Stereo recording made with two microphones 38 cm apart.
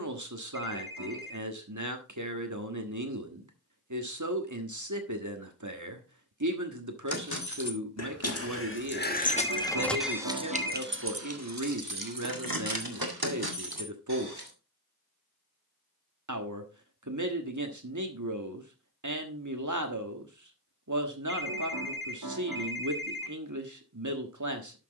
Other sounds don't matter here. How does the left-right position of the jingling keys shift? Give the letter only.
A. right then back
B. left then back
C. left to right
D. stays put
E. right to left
C.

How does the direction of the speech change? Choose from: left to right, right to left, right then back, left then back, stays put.
stays put.